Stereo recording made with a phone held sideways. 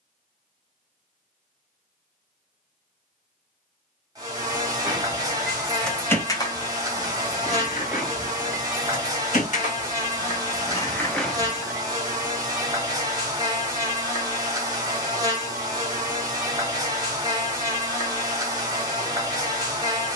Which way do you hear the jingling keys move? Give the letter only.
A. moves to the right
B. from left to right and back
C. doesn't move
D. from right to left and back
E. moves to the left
D.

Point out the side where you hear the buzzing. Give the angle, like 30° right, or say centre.
30° right.